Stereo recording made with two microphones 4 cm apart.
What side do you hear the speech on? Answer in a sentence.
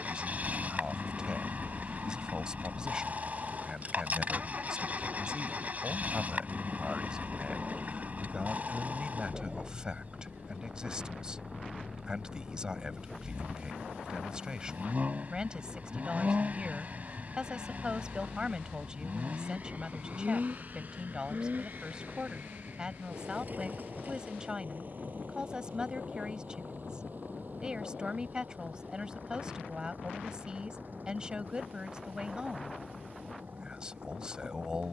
You can hear the speech on the right.